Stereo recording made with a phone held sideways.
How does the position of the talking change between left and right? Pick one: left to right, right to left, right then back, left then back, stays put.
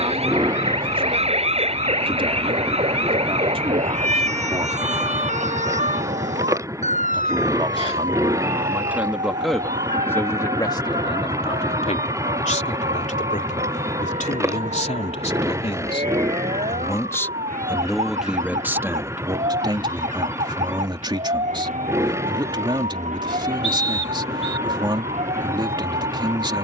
left then back.